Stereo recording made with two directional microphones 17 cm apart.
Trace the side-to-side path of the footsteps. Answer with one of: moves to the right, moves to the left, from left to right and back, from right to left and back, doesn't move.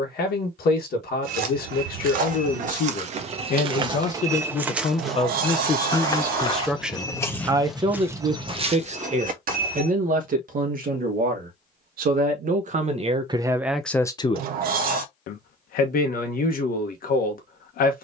from right to left and back.